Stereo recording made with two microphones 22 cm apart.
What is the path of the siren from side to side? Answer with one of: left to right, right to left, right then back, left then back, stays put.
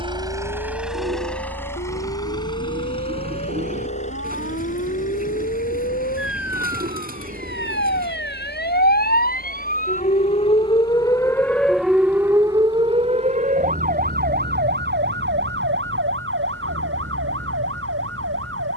left to right.